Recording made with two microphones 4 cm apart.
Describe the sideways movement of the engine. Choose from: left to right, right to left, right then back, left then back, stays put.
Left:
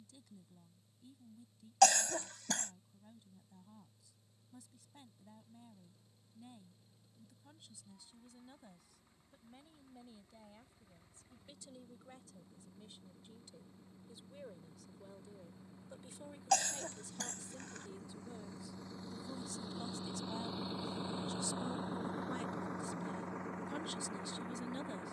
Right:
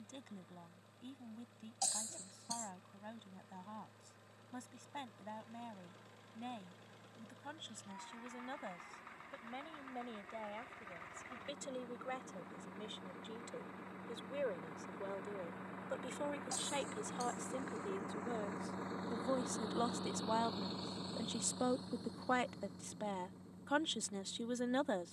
right to left.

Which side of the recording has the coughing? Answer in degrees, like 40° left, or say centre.
80° left.